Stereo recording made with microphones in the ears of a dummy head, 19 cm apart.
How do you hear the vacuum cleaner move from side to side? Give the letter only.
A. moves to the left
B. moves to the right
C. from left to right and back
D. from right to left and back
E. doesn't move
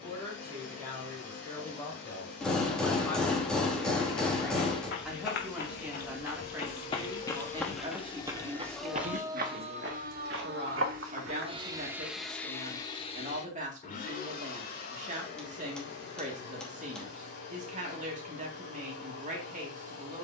C.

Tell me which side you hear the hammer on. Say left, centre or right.
centre.